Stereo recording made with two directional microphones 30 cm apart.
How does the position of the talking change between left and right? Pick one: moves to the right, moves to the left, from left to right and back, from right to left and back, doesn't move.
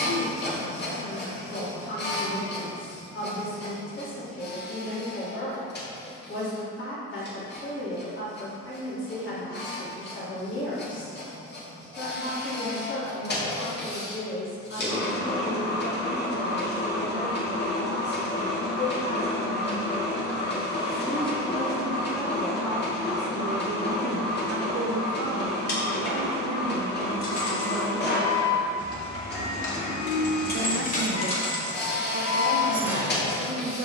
moves to the right.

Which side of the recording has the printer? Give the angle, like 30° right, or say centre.
30° left.